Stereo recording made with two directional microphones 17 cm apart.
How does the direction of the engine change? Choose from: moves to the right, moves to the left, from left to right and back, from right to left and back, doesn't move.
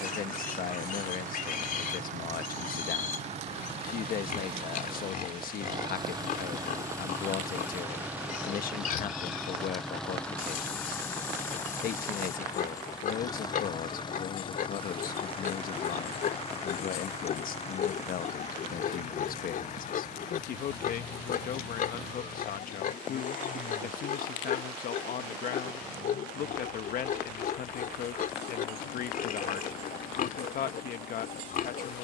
moves to the left.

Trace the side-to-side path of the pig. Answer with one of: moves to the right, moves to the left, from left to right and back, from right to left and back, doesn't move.
doesn't move.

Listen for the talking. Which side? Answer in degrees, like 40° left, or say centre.
60° left.